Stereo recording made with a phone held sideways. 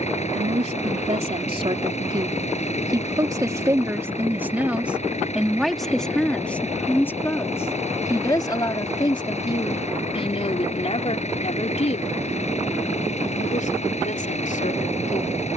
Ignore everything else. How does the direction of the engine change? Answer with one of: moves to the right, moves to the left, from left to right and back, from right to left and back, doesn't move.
doesn't move.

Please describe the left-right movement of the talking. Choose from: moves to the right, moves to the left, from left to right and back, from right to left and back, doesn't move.
moves to the left.